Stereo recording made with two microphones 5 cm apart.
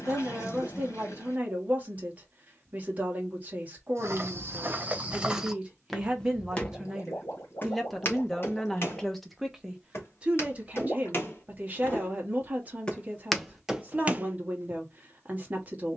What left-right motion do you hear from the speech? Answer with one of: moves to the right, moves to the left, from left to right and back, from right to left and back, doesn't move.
from right to left and back.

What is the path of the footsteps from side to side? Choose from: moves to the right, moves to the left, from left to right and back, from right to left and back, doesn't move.
from right to left and back.